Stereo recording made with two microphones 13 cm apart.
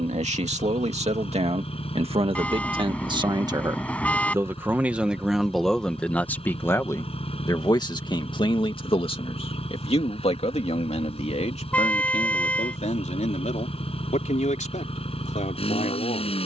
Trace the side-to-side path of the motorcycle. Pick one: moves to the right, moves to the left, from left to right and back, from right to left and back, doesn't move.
doesn't move.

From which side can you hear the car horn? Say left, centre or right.
centre.